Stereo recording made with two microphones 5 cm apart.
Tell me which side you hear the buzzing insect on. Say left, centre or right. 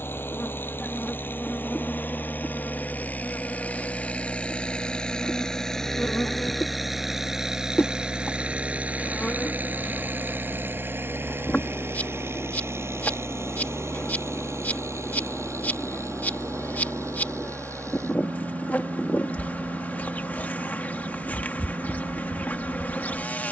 left.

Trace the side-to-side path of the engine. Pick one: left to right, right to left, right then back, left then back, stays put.
left to right.